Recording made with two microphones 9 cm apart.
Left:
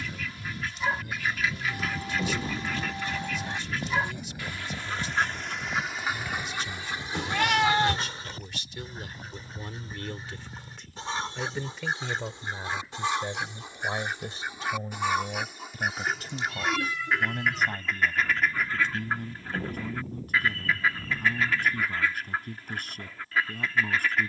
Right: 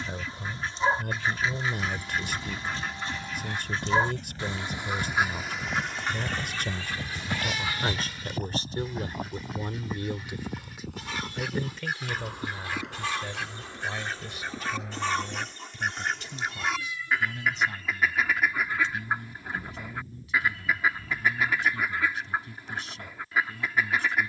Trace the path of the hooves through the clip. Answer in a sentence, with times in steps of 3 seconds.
In this clip you hear the hooves on the left from 0 s, in the centre from 3 s, on the right from 6 s and not at all from 18 s.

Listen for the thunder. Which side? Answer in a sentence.
You can hear the thunder on the left.